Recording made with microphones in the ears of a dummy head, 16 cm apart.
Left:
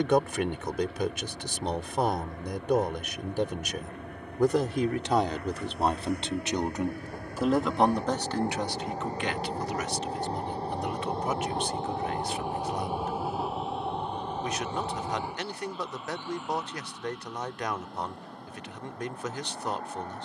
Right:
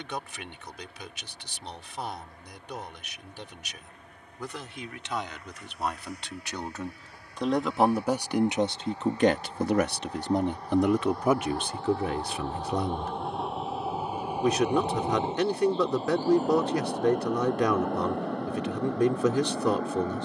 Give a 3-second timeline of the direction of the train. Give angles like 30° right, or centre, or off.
60° left, 50° left, 40° left, 30° left, centre, 30° right, 60° right.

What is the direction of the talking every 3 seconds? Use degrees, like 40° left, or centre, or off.
40° left, 40° left, centre, 60° right, 80° right, 80° right, 80° right.